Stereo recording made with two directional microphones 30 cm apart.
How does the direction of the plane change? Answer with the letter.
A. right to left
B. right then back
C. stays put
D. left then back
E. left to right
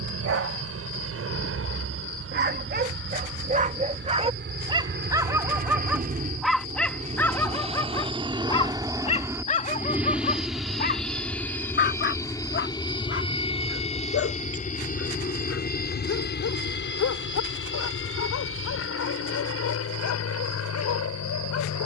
A.